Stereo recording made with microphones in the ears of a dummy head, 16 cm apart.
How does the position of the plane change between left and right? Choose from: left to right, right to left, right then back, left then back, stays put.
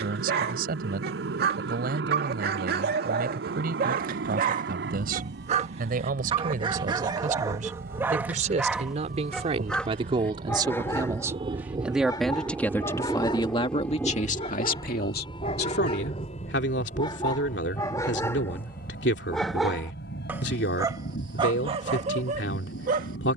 right to left.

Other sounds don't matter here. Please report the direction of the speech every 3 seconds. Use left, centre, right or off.
right, right, right, right, left, left, left, left.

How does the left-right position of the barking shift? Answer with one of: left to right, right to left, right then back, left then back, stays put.
left then back.